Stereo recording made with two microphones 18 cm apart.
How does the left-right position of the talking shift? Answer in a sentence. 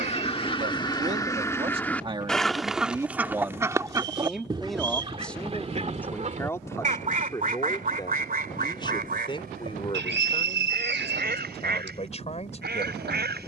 In this clip you hear the talking move to the left.